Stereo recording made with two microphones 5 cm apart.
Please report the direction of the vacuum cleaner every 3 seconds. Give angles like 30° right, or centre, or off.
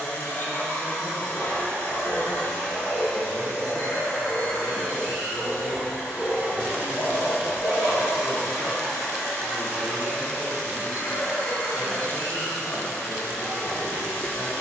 30° left, centre, 20° right, 20° left, 30° left.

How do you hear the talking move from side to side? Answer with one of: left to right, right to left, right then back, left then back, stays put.
stays put.